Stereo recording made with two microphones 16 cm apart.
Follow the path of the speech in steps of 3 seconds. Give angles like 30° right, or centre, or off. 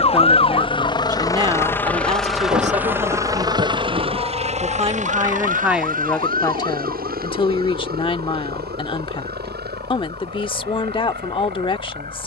30° right, 30° right, 30° left, 30° left.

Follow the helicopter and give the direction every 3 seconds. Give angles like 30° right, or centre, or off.
20° left, 40° right, 60° right, 70° right.